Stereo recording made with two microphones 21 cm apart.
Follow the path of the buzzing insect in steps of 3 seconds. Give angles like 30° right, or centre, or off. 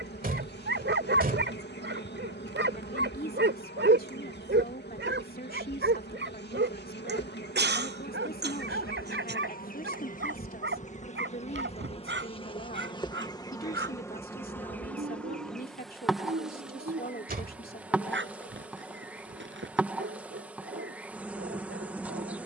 60° left, 60° left, 50° left, 40° left, 20° left, centre, 10° right, 10° right.